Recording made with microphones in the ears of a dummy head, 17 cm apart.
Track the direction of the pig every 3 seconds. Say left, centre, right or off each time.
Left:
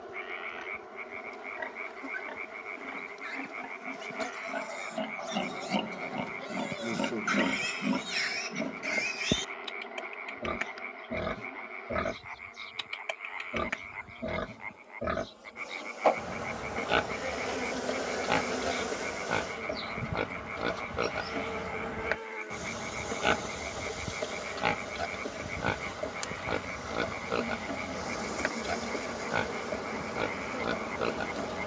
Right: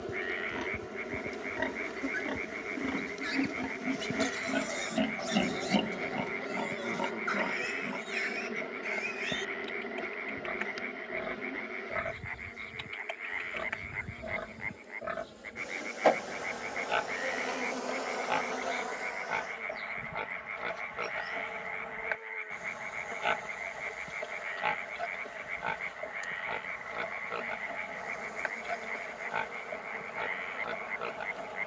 right, right, left, left, left, left, left, left, left, left, left.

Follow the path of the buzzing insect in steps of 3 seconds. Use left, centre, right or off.
right, right, right, right, right, centre, left, left, left, left, left.